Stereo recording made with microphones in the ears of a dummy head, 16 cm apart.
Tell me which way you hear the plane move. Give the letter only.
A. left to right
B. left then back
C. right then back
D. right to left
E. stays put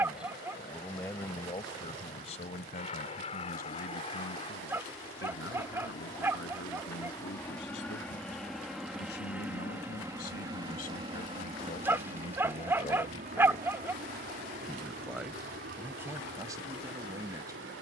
A.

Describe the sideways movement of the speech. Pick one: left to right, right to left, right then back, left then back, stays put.
left then back.